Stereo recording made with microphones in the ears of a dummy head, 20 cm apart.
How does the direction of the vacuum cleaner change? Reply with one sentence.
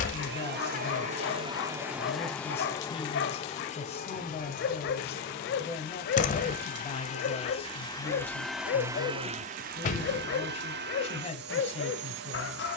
You can hear the vacuum cleaner go left and come back.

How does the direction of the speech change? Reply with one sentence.
You can hear the speech stay in one place.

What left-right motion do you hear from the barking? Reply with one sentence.
You can hear the barking stay put.